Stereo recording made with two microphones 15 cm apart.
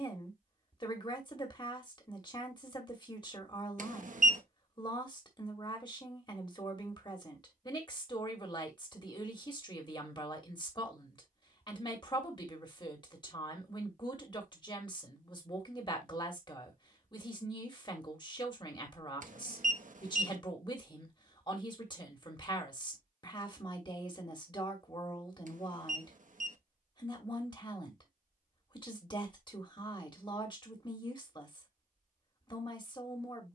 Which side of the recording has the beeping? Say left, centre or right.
right.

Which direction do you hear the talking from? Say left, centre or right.
left.